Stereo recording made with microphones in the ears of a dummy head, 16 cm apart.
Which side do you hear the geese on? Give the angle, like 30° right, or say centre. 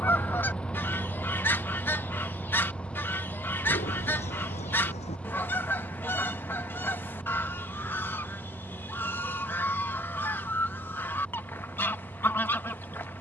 10° left.